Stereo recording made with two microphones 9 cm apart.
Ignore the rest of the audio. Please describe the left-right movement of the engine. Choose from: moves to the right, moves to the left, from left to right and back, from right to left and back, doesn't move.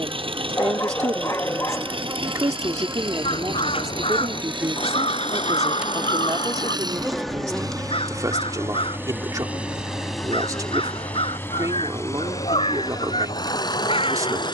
moves to the left.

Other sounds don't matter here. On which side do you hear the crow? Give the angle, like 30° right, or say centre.
80° left.